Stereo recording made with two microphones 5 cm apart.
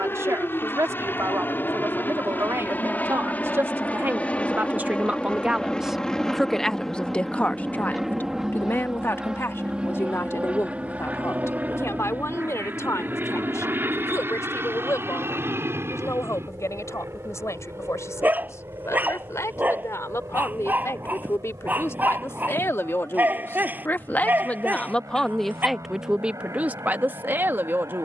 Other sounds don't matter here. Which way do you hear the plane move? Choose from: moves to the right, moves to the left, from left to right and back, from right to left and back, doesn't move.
moves to the right.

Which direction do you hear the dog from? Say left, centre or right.
right.